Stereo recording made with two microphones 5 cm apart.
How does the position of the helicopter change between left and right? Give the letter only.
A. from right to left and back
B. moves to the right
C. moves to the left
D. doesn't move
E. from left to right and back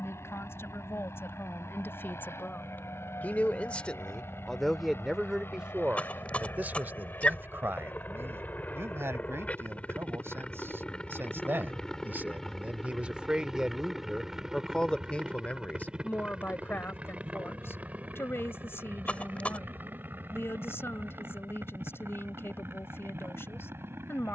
B.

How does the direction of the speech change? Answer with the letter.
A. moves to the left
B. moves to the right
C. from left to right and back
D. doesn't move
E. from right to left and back
C.